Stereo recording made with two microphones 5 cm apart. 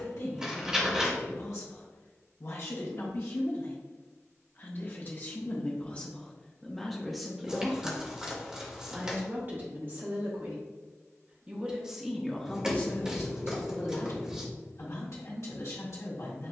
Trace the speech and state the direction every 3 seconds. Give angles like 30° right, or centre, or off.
70° left, 40° left, centre, 30° right, 40° left, 70° left.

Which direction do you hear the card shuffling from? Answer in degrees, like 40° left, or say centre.
10° right.